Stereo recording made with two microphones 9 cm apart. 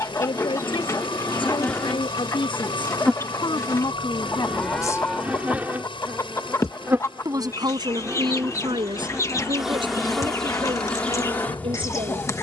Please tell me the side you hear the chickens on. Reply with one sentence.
In this clip you hear the chickens on the left.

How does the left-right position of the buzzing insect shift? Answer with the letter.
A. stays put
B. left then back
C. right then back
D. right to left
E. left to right
C.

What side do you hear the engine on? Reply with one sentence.
You can hear the engine on the left.